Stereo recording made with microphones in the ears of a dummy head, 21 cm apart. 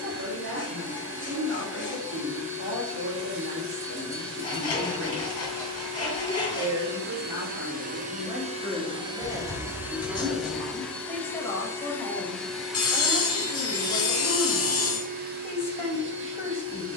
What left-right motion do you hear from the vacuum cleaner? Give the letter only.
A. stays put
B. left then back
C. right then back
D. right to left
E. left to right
B.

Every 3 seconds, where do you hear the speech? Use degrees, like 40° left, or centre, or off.
50° right, 40° right, 20° right, centre, 10° left, 10° left.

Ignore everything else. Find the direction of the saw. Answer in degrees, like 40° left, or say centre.
20° left.